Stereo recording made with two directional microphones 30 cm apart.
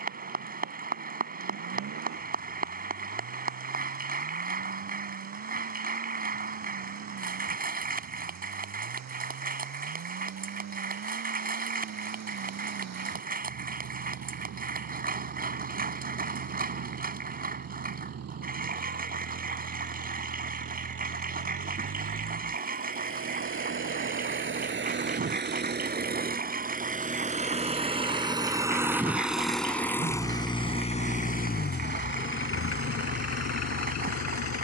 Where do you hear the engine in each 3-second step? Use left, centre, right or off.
right, right, right, right, right, right, right, right, right, centre, left, left.